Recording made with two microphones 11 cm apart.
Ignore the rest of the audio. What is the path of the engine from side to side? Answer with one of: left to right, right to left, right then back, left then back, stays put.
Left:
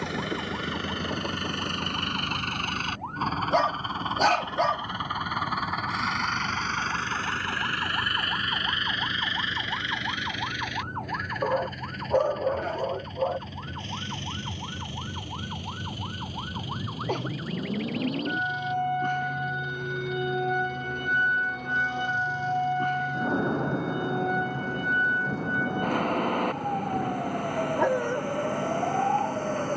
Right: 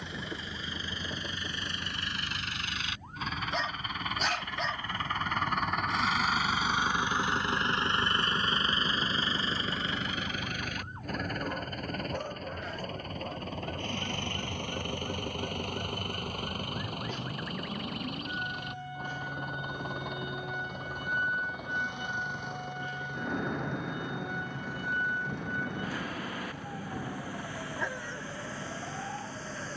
left to right.